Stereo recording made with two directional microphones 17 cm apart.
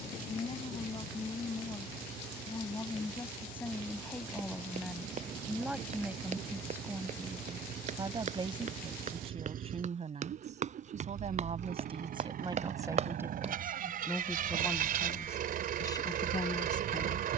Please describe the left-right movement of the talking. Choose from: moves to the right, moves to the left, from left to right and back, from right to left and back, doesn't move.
from left to right and back.